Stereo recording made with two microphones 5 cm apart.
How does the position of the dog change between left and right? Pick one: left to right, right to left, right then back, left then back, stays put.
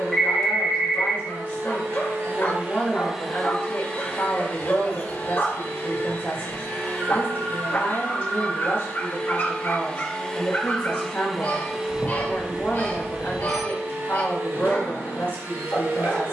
stays put.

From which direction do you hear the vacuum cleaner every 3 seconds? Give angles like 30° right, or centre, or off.
50° right, 30° left, 40° left, 10° left, 40° right, 50° right.